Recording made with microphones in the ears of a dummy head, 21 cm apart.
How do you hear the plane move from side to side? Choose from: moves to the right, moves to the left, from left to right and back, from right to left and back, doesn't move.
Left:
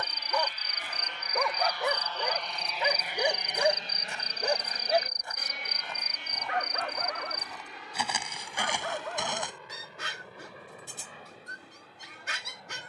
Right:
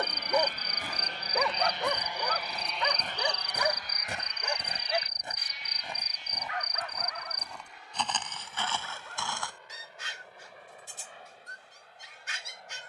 moves to the left.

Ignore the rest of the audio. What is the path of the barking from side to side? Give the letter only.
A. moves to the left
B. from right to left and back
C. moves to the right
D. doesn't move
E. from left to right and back
A.